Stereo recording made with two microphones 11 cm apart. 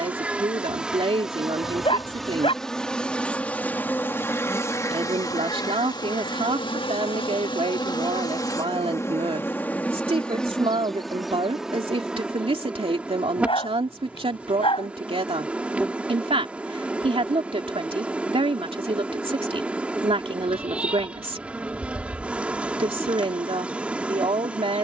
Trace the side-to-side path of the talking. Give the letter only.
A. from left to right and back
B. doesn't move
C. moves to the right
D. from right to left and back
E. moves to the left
B.